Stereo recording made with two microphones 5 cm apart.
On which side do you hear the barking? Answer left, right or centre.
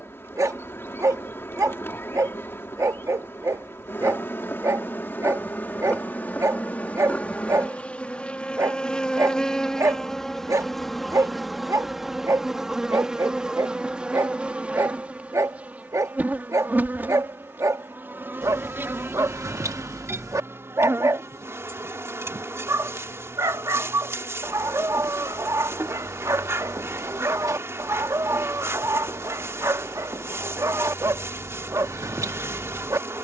right.